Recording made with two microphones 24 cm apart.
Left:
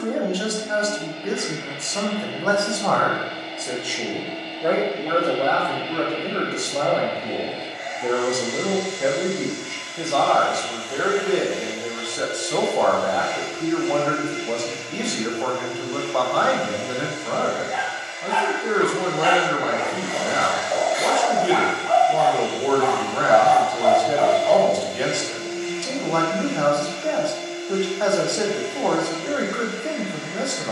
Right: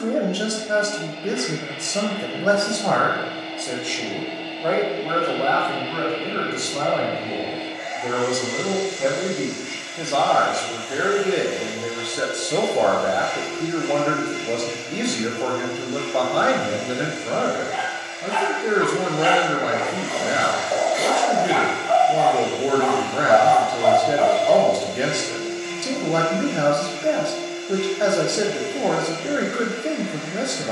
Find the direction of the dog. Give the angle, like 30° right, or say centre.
30° right.